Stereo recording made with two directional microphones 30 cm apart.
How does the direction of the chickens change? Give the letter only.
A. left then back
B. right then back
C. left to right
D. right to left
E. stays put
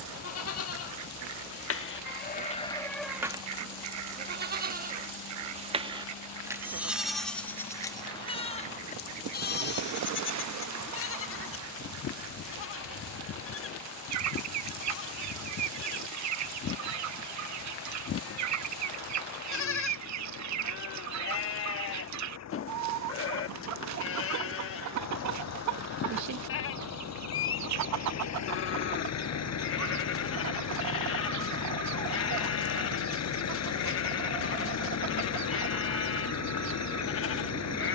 E.